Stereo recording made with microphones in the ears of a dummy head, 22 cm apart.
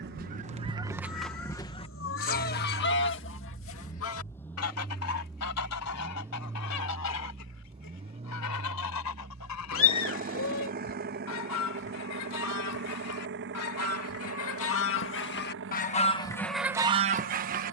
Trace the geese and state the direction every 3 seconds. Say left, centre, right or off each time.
centre, left, left, left, left, centre.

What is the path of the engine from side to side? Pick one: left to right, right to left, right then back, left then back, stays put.
left to right.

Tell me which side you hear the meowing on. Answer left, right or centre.
left.